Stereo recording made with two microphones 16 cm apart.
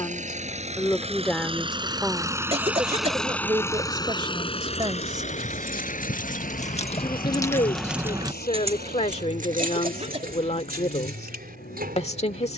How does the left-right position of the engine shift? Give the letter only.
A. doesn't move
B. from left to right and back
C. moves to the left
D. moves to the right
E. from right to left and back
C.